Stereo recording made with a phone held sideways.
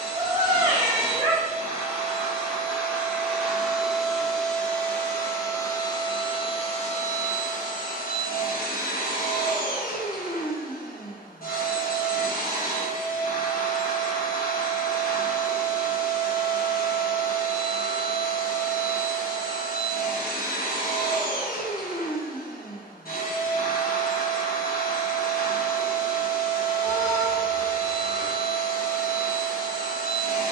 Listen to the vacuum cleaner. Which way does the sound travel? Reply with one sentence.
You can hear the vacuum cleaner travel towards the left.